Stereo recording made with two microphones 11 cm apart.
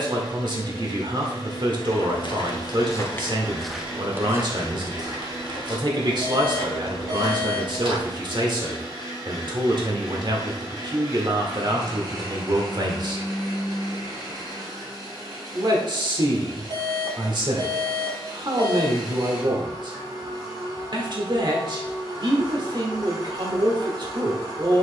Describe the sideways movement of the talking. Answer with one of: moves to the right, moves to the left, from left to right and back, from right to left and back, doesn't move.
doesn't move.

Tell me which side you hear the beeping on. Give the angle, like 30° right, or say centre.
40° right.